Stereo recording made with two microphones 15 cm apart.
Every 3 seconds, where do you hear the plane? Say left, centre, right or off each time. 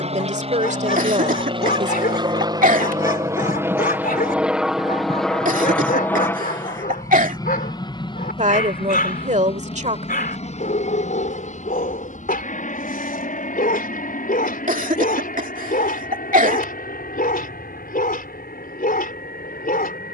right, centre, left, left, left, left, left.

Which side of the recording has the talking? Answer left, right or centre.
right.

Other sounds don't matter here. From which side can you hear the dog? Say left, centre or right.
left.